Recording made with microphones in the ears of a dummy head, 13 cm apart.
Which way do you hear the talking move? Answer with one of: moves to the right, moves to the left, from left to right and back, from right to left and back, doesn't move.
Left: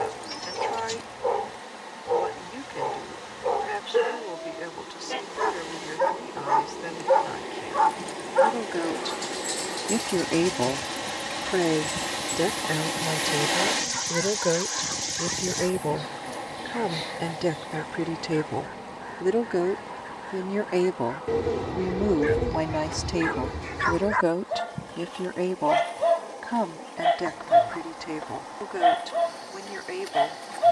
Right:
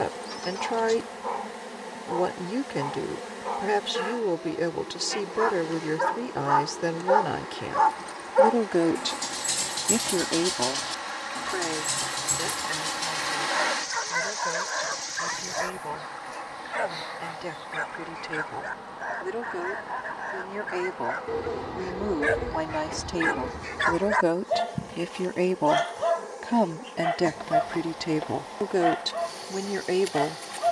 from right to left and back.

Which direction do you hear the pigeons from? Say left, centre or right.
left.